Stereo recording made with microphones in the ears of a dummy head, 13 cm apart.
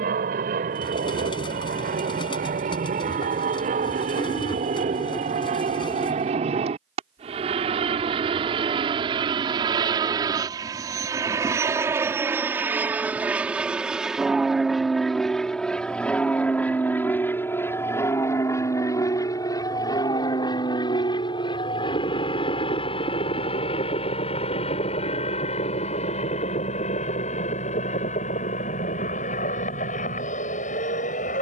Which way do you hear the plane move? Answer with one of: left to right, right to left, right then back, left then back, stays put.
right to left.